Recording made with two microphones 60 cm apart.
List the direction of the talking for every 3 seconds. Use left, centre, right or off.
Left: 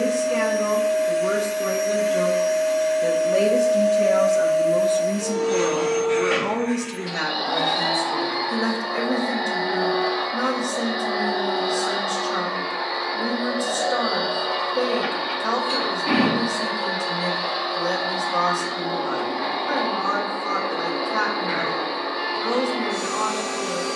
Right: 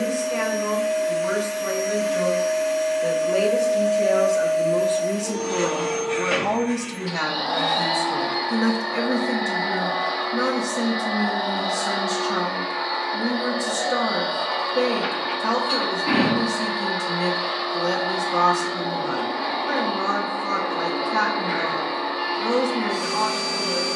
left, left, right, right, right, right, right, right.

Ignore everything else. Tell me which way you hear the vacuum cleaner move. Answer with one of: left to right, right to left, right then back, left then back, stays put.
stays put.